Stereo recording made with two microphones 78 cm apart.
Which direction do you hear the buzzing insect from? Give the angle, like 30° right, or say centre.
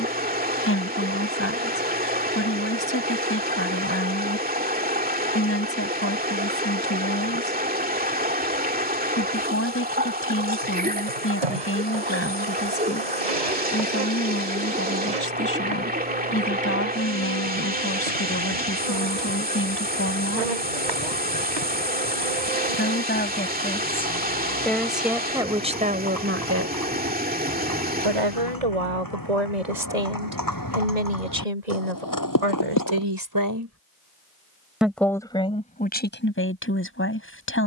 60° right.